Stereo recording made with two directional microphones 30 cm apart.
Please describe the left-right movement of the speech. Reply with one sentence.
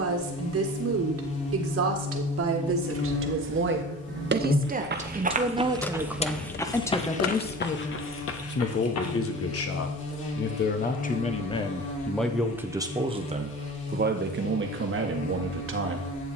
You can hear the speech go left and come back.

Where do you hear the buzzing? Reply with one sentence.
You can hear the buzzing on the left.